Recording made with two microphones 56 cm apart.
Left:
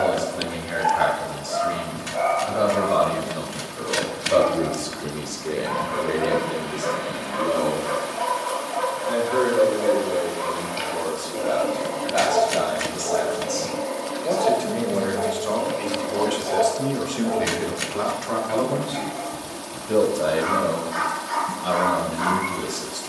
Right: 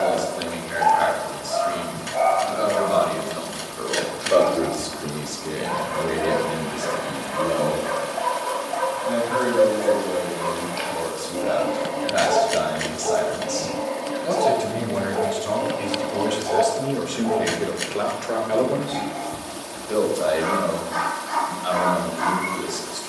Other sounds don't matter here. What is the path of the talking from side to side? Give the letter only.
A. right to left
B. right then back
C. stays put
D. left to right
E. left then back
B.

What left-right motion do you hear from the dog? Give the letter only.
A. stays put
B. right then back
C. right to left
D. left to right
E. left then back
A.